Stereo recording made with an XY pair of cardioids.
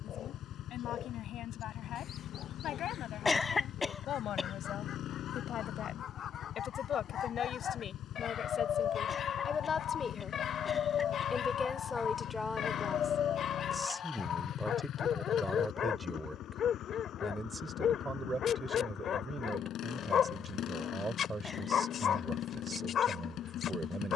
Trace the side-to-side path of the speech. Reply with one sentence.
You can hear the speech travel towards the right.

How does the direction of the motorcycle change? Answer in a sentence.
You can hear the motorcycle stay in one place.